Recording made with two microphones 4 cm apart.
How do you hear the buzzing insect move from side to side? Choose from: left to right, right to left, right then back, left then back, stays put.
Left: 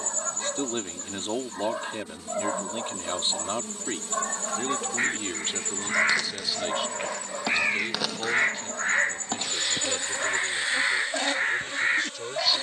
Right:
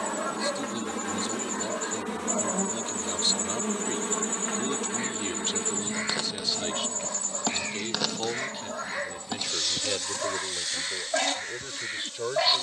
right to left.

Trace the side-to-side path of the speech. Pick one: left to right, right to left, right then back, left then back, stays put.
left to right.